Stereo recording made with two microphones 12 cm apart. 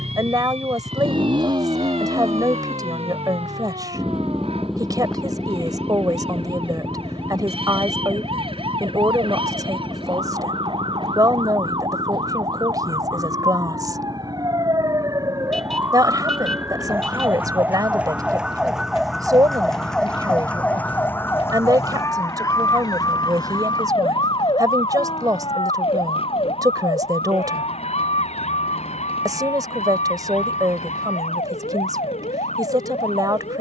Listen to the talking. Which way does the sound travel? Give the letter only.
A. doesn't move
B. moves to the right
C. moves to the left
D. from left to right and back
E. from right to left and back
A.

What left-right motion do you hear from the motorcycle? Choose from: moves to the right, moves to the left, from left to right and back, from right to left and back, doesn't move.
moves to the left.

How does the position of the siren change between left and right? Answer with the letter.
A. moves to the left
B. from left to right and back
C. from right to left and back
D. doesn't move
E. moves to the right
A.